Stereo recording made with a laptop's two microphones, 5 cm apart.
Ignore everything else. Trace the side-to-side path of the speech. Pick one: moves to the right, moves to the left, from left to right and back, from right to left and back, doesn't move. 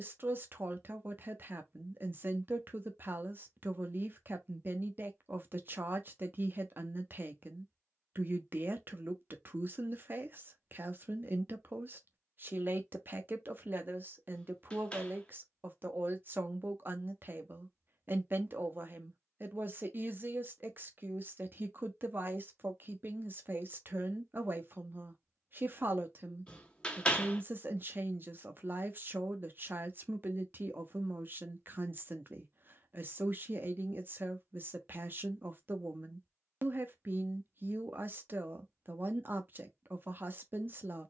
doesn't move.